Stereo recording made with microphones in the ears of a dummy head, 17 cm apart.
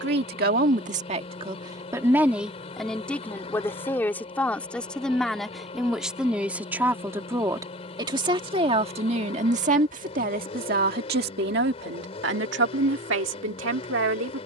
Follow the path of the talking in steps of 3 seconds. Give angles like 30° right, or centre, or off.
30° right, 10° left, 20° right, 50° right, 70° right.